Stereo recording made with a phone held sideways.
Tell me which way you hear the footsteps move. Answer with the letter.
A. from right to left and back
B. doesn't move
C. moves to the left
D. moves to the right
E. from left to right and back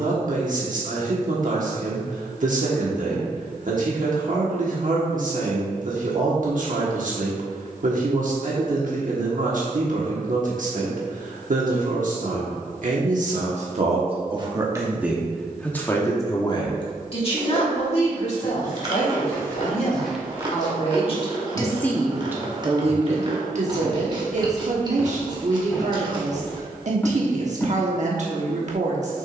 E.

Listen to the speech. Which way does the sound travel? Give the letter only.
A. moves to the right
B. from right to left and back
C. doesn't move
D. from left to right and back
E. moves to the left
B.